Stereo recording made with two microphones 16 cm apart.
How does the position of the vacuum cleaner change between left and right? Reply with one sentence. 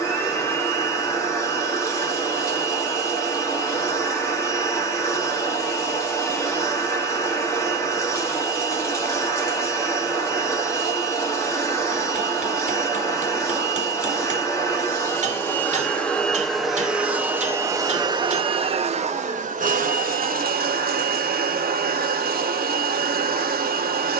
In this clip you hear the vacuum cleaner go from the left side to the right.